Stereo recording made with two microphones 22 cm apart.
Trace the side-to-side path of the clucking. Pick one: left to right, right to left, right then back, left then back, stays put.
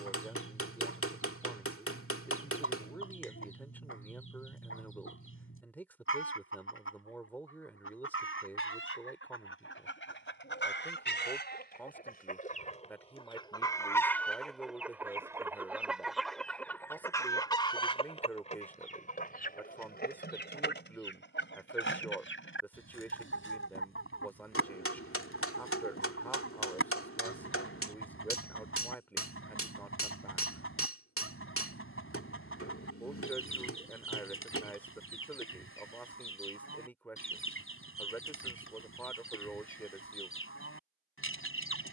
right then back.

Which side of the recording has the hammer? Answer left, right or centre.
left.